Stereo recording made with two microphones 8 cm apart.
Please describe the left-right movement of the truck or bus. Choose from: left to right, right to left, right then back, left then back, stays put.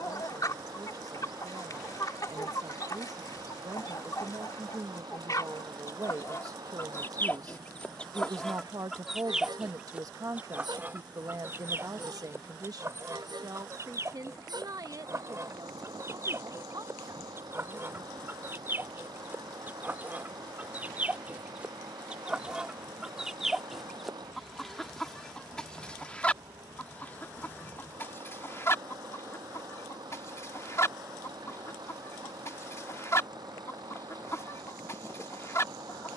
stays put.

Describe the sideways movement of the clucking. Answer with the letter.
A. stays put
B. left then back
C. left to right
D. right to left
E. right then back
E.